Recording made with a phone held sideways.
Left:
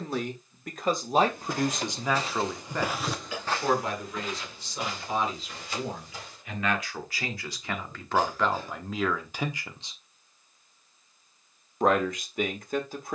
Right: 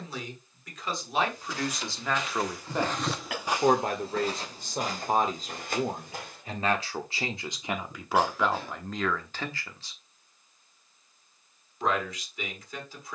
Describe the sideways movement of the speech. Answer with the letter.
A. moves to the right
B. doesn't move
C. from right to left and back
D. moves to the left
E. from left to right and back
E.